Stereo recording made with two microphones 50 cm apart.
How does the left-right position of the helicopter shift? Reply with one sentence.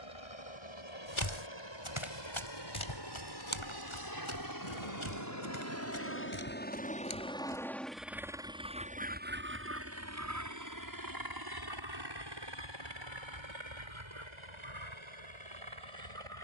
You can hear the helicopter go from the left side to the right.